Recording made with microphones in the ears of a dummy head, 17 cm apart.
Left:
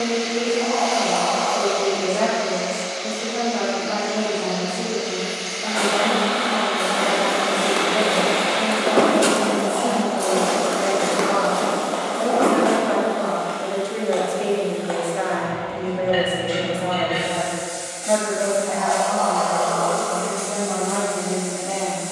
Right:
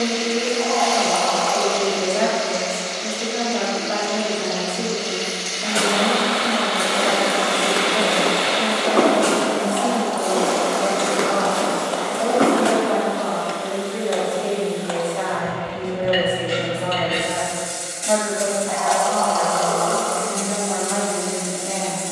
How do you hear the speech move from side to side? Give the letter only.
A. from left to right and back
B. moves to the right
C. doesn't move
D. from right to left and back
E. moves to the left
D.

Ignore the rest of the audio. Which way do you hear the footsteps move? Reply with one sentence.
You can hear the footsteps go left and come back.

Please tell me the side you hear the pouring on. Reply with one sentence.
You can hear the pouring on the right.